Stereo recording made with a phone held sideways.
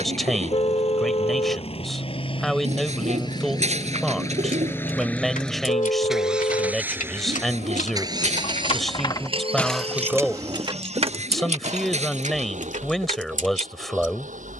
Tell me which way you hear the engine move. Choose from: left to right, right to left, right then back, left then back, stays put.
left to right.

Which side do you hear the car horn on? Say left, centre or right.
left.